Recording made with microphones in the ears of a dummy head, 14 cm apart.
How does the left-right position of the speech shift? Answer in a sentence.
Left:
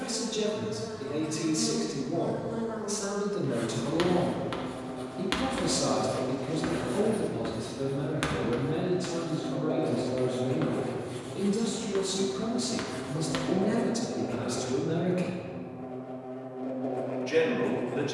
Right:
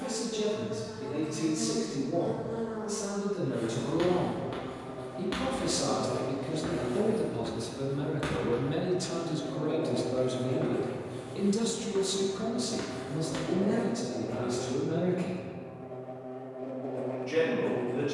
You can hear the speech move from left to right and back again.